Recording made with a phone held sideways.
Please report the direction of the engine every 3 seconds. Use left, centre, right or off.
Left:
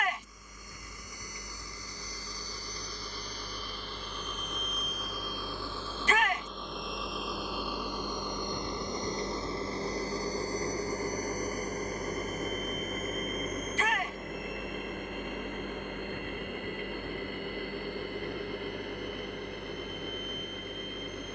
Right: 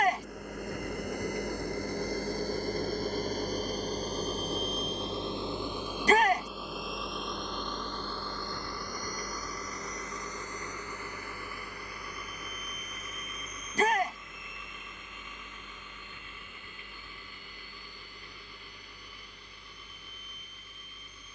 right, right, centre, left, left, left, left.